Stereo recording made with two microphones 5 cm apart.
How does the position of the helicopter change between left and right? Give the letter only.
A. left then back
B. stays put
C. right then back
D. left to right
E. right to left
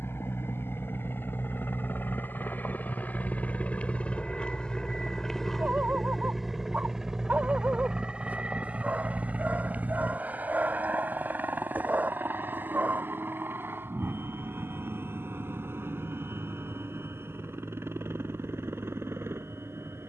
D.